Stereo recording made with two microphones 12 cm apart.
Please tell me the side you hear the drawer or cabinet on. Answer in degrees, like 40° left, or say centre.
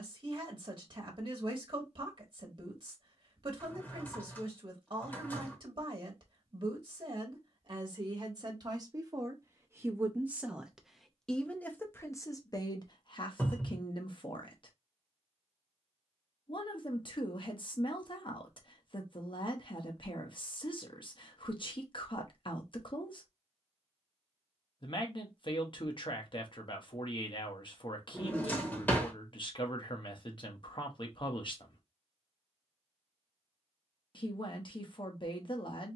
20° left.